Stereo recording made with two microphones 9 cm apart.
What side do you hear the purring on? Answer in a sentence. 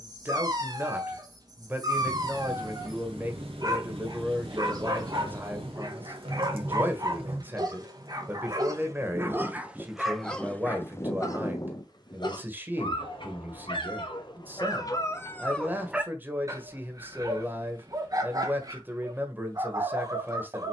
You can hear the purring on the right.